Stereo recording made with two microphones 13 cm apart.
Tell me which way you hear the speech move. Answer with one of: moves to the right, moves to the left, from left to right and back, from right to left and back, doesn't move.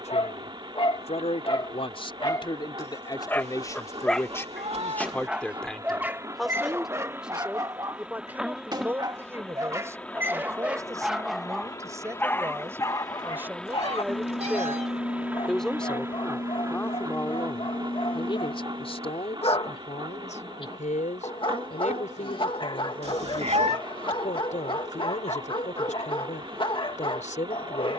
from left to right and back.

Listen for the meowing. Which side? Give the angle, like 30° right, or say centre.
50° right.